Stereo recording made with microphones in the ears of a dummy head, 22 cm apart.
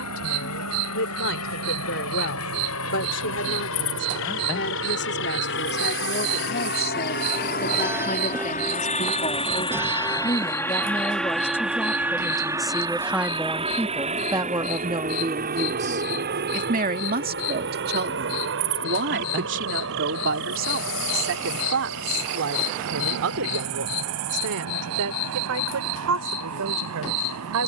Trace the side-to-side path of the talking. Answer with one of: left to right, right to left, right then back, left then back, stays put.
left to right.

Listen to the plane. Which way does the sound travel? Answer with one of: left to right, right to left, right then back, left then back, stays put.
left to right.